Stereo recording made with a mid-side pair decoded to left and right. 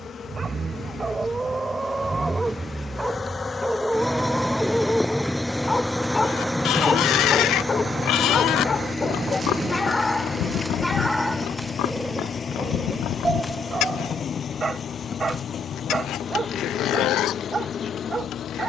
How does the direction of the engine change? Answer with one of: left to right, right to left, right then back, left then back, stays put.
right to left.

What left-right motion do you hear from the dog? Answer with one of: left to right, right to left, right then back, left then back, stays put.
left then back.